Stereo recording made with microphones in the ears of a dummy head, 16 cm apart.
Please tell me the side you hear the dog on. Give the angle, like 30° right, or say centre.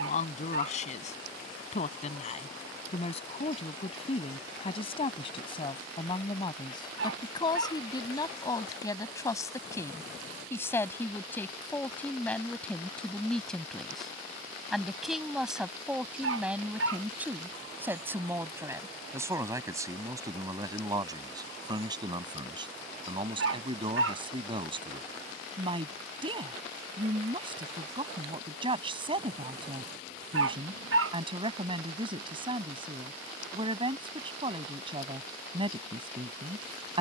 80° right.